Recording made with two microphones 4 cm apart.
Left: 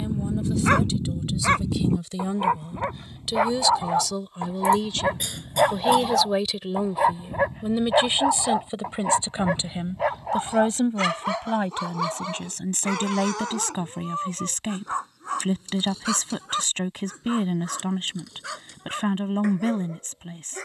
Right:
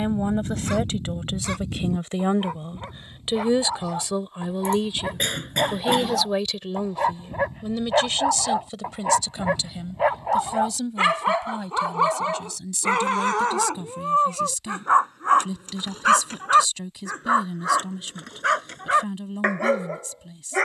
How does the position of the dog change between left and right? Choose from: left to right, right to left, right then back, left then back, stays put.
left to right.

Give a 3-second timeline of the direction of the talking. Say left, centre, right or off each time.
right, right, centre, left, left, left, left.